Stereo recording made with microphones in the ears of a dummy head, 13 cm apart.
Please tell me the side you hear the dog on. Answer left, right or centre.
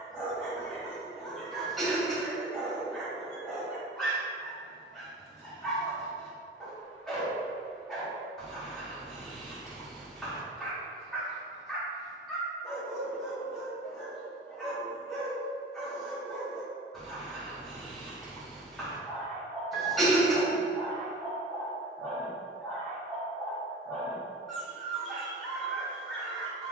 centre.